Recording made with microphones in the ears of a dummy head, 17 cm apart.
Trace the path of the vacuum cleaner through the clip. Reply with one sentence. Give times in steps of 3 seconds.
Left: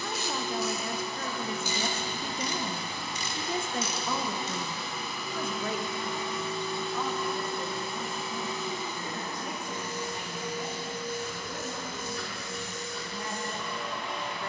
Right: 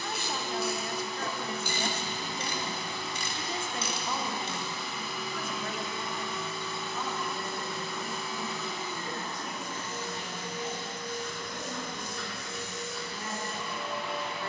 In this clip you hear the vacuum cleaner on the left from 0 s and in the centre from 9 s.